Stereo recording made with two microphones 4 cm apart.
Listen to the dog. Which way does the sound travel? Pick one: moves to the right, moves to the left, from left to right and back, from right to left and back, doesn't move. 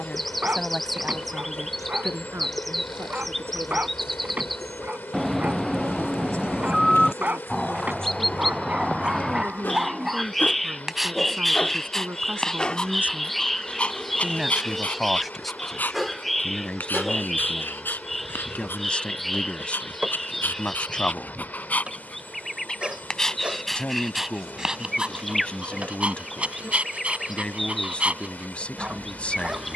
from right to left and back.